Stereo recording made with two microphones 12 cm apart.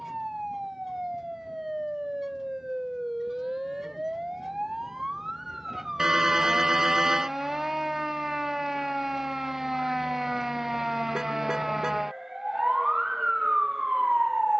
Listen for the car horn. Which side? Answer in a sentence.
You can hear the car horn in the centre.